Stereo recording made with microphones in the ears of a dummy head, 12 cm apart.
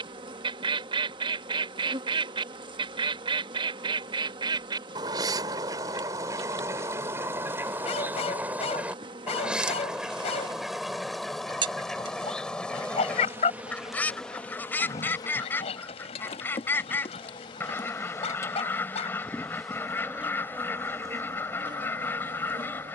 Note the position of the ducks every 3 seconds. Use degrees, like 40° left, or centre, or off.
40° right, 30° right, 20° right, centre, 10° left, 20° left, 20° left, 20° left.